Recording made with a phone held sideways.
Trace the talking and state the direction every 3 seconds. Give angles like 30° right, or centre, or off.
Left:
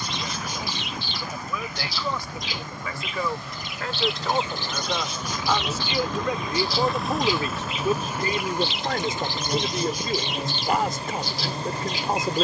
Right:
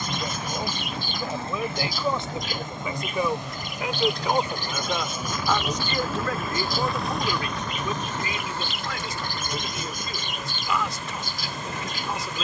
30° right, 10° right, 30° left, 50° left.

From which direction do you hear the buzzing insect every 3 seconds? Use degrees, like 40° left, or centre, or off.
30° right, 20° right, 10° left, 30° left.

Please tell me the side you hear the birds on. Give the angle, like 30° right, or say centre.
50° right.